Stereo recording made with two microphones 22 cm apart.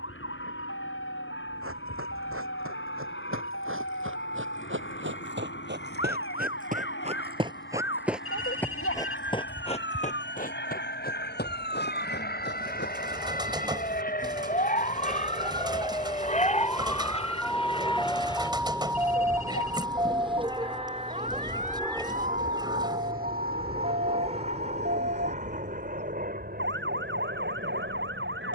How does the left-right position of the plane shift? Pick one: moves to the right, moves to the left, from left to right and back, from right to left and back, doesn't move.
moves to the right.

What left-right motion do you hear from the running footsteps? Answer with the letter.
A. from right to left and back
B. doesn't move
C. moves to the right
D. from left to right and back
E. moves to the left
E.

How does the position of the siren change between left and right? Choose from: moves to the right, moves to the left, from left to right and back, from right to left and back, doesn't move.
moves to the right.